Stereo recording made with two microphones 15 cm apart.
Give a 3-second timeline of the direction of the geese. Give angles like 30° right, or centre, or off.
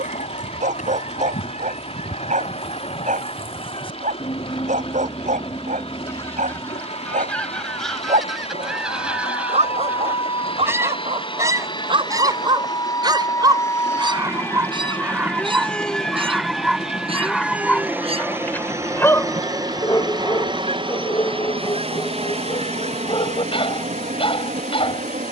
60° left, 30° left, 10° left, 10° right, 30° right, 40° right, 40° right, 50° right, 50° right.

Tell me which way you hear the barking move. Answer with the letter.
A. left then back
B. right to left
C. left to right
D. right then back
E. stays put
B.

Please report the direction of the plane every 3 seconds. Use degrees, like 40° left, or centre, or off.
60° left, 60° left, 50° left, 40° left, 20° left, centre, 20° right, 40° right, 50° right.